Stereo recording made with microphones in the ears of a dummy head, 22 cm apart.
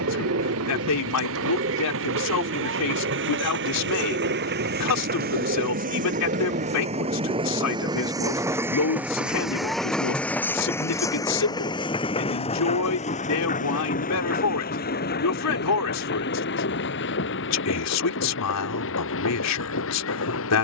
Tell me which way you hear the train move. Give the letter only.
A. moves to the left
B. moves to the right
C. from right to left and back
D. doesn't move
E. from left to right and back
A.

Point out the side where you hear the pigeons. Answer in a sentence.
You can hear the pigeons on the right.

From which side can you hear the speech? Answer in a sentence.
You can hear the speech on the left.